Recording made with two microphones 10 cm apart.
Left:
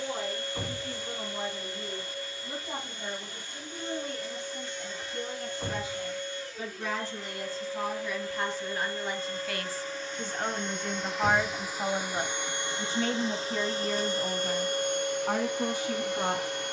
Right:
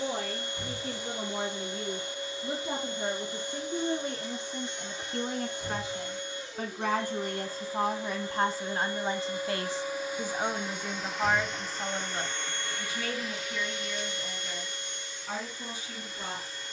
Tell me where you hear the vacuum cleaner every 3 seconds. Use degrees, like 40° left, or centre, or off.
20° right, 20° right, 20° right, 10° right, 30° left, 60° left.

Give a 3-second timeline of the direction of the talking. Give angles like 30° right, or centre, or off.
70° right, 60° right, 50° right, 10° right, 40° left, 60° left.